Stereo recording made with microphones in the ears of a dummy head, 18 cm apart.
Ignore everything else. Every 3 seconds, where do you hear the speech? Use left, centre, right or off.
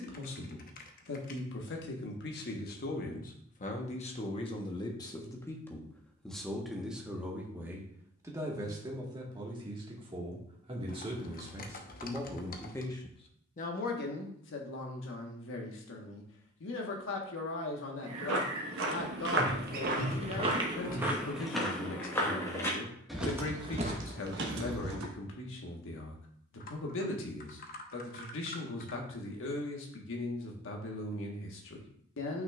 left, left, centre, right, left, left, left, left, left, left, left.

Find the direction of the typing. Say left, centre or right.
left.